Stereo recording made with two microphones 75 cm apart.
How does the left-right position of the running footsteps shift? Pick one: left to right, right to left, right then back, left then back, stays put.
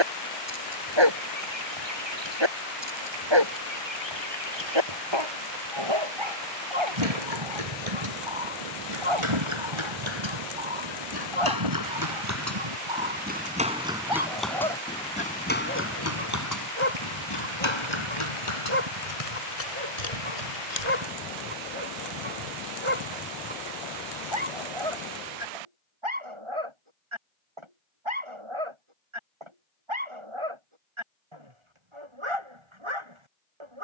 right to left.